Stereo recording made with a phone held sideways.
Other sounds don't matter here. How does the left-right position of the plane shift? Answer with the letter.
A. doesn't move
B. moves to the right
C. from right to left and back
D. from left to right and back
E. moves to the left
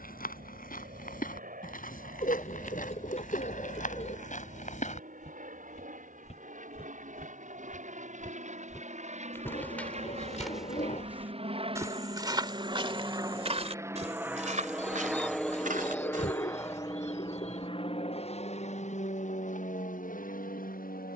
E.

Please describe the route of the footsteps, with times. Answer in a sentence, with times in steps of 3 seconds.
In this clip you hear the footsteps on the left from 0 s, in the centre from 9 s, on the right from 12 s and not at all from 18 s.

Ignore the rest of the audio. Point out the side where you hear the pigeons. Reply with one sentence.
You can hear the pigeons on the left.